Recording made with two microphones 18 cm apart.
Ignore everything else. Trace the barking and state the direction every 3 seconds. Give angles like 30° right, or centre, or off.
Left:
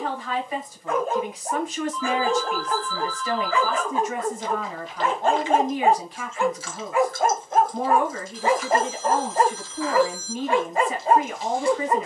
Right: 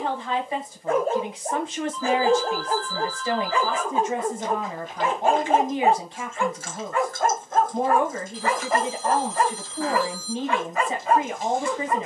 40° right, 20° right, 20° left, 30° left.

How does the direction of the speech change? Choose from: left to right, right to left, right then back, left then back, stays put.
stays put.